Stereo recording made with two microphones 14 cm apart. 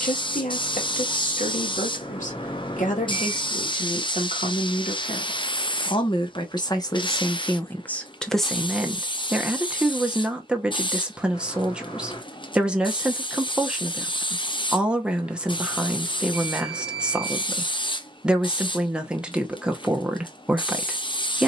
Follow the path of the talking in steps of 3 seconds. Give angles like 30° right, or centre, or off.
60° left, 50° left, 20° left, 10° right, 10° right, 10° right, 10° right.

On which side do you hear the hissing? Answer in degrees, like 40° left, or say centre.
30° left.